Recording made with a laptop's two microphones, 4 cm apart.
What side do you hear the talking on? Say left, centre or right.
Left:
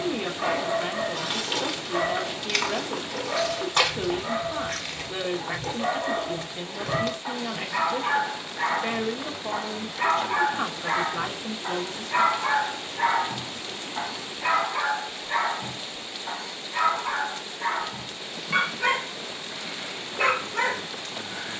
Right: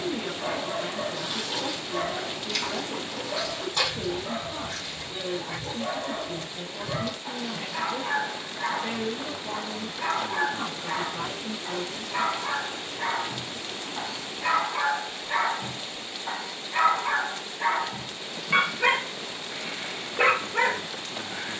left.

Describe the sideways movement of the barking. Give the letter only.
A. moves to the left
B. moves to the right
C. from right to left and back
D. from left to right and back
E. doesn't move
B.